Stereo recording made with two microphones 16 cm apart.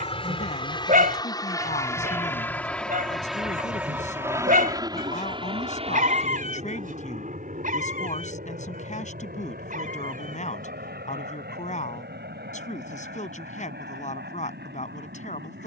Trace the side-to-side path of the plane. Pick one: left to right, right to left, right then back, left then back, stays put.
left to right.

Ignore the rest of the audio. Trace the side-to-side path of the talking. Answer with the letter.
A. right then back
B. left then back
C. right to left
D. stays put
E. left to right
D.